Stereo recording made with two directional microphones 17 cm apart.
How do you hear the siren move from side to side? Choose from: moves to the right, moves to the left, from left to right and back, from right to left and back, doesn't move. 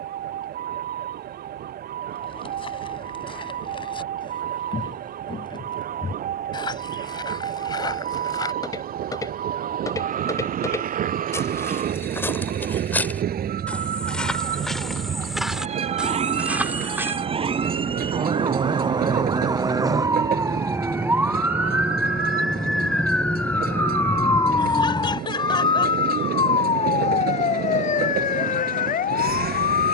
moves to the left.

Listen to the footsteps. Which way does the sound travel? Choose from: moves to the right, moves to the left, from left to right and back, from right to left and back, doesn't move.
moves to the right.